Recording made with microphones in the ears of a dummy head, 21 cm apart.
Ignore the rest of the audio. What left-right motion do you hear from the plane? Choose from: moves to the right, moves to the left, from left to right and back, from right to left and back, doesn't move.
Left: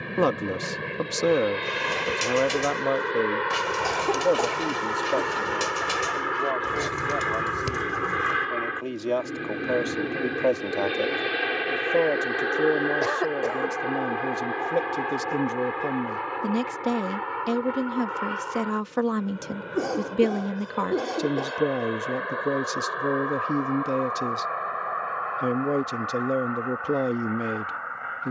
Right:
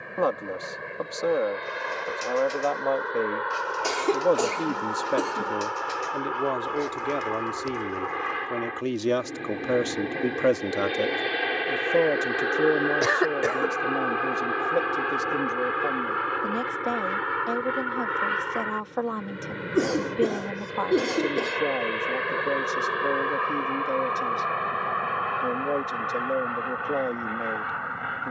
moves to the right.